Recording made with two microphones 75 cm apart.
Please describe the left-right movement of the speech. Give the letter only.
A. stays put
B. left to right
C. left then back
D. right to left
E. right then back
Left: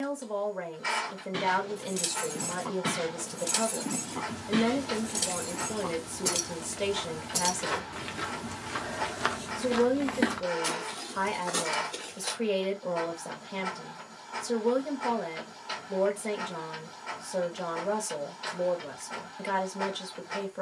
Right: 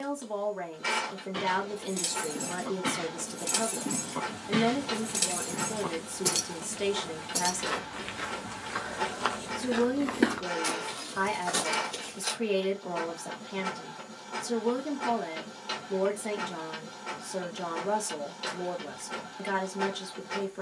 A.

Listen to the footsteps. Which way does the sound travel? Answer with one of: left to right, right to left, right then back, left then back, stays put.
left to right.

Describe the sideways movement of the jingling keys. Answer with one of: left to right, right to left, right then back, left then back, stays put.
right then back.